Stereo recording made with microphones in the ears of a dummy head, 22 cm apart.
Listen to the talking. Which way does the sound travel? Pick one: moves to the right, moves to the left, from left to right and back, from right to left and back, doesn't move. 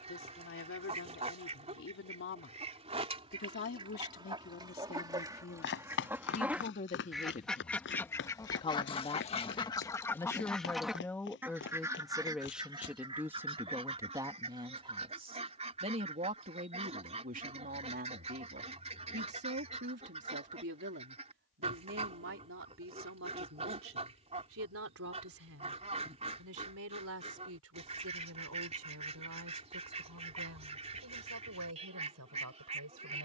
moves to the right.